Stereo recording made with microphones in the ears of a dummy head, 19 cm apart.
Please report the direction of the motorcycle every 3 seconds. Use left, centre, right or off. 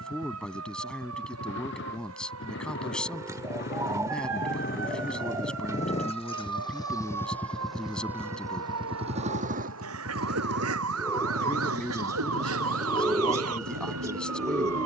left, left, centre, right, right.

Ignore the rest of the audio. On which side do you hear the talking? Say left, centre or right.
centre.